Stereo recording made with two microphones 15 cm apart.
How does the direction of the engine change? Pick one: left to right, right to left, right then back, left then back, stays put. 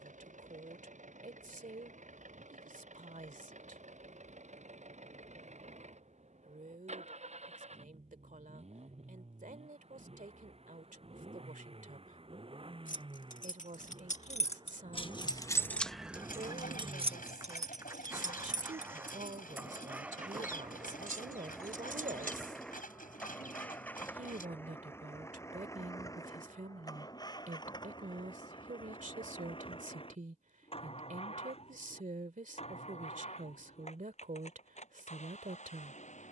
right to left.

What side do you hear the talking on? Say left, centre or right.
right.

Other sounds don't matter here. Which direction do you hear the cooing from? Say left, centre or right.
left.